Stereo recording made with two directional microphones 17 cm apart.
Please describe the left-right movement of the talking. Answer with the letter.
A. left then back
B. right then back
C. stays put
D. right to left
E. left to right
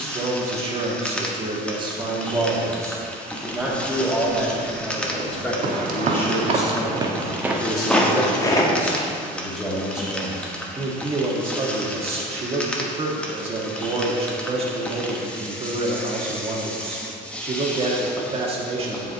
A.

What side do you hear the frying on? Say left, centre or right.
centre.